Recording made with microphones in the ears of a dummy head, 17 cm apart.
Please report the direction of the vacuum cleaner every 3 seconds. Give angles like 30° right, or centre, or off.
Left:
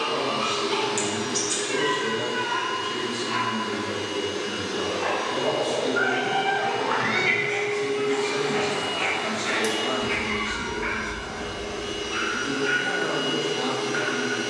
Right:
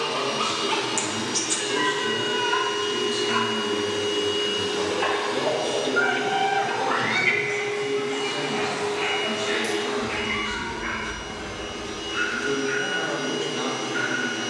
60° right, 60° right, 30° right, centre, 10° left.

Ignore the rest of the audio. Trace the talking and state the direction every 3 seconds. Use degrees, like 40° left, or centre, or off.
40° right, 30° right, 40° left, 10° left, 30° right.